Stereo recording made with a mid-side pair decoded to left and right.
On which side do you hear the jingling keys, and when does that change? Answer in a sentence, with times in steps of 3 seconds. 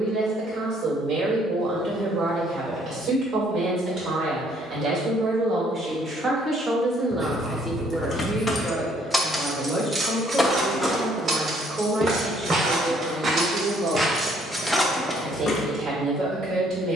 You can hear the jingling keys not at all from 0 s, on the left from 6 s, on the right from 9 s and on the left from 15 s.